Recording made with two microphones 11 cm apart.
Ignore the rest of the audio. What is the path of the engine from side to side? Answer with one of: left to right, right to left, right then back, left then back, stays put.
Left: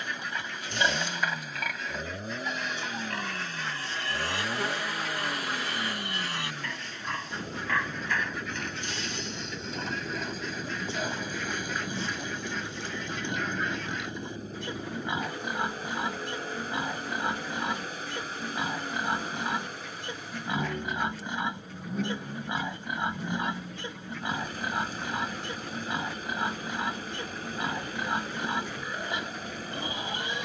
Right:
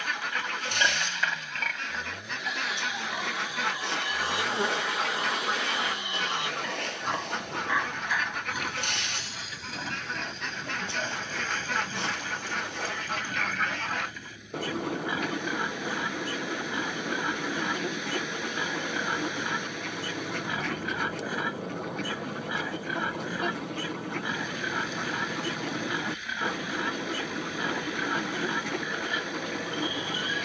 stays put.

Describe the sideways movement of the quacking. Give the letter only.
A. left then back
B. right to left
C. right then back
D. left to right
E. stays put
E.